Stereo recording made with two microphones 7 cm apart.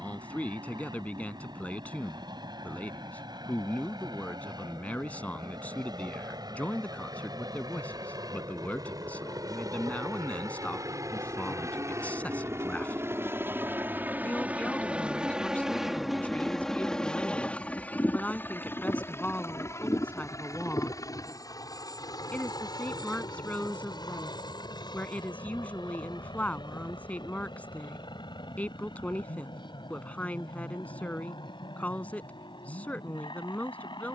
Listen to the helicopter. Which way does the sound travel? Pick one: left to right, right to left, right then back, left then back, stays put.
right to left.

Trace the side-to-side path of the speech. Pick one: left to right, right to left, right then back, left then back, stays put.
stays put.